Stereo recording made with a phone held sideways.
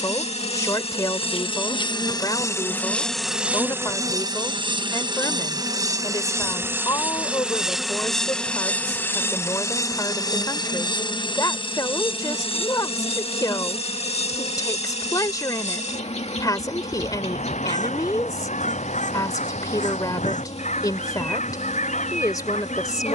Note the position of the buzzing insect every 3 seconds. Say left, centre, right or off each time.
left, right, centre, left, left, left, left, left.